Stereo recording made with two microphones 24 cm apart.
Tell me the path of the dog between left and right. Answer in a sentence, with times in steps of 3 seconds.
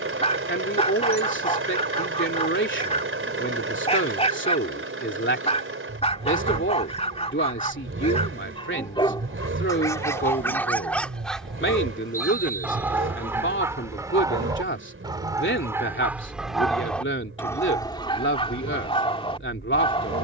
You can hear the dog on the left from 0 s, in the centre from 9 s and on the left from 18 s.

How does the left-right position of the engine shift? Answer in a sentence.
You can hear the engine stay put.